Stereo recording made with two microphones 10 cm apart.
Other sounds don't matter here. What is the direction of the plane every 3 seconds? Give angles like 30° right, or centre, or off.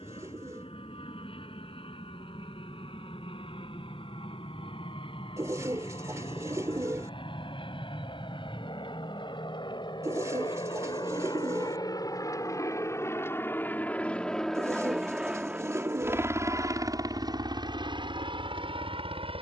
70° left, 70° left, 60° left, 50° left, 20° left, 30° right, 50° right.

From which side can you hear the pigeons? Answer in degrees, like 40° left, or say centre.
30° right.